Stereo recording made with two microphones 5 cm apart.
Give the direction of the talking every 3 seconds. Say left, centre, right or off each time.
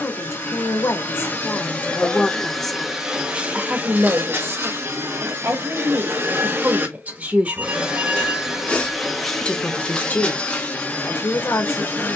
left, right, right, left.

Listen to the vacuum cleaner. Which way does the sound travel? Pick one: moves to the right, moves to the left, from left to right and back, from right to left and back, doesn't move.
from left to right and back.